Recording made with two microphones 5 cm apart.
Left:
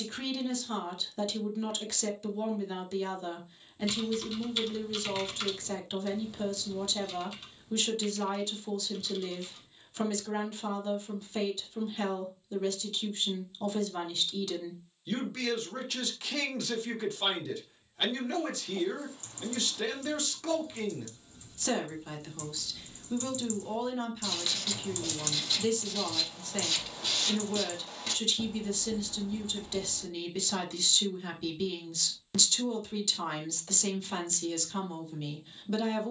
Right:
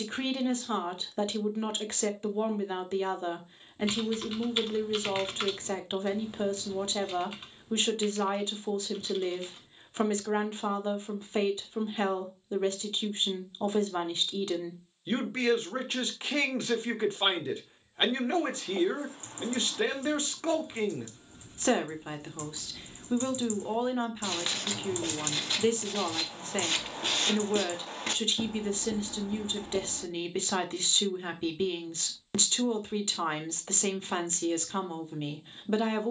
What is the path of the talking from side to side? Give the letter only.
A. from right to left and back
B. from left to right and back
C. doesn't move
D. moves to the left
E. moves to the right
C.